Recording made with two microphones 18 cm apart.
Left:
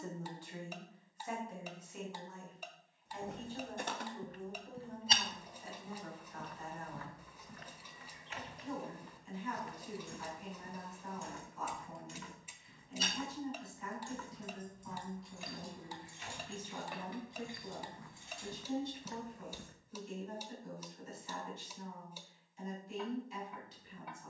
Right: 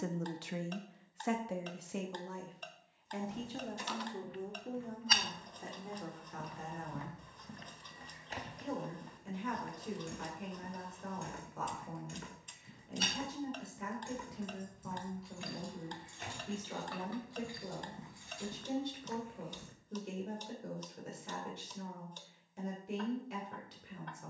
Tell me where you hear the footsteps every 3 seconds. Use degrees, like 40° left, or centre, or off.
off, 40° left, 30° right, 50° right, 60° right, 50° right, 20° left, off.